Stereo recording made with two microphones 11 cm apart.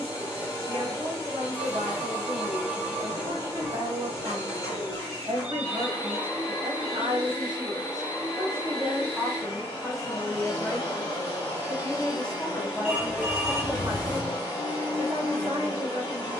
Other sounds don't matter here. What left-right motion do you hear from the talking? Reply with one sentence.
You can hear the talking move from right to left and back again.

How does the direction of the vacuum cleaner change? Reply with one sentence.
You can hear the vacuum cleaner stay put.